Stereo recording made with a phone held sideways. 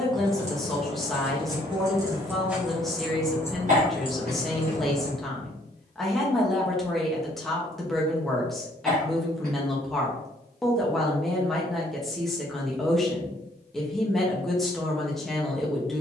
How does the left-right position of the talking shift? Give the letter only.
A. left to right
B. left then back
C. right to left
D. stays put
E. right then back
D.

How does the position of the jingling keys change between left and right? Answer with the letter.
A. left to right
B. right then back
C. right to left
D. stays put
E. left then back
C.